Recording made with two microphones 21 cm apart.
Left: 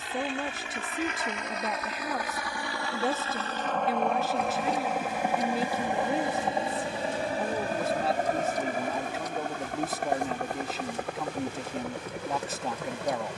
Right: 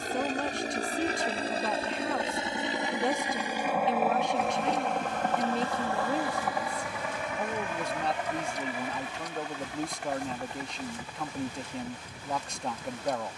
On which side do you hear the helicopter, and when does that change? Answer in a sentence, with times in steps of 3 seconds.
In this clip you hear the helicopter on the right from 0 s, in the centre from 3 s and on the left from 6 s.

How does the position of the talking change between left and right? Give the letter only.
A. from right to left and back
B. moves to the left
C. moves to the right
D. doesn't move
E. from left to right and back
D.